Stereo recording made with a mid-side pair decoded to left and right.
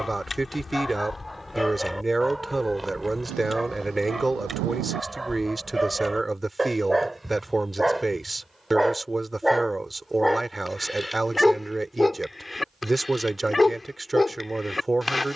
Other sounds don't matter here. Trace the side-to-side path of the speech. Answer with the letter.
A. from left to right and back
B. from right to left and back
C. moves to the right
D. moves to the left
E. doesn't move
E.